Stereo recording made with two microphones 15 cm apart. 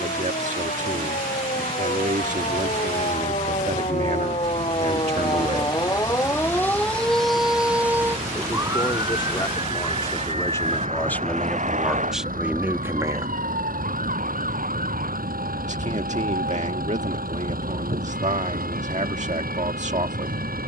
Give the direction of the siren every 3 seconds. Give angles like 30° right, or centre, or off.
60° left, 40° left, centre, 40° right, 60° right, 70° right, 70° right.